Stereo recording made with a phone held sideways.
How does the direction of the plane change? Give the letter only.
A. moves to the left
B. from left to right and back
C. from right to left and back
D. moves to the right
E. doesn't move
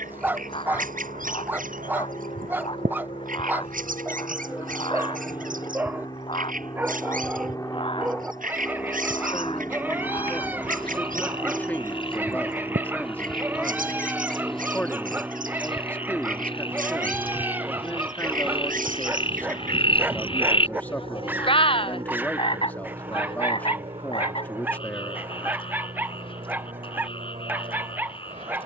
D.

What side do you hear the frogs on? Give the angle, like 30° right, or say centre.
40° left.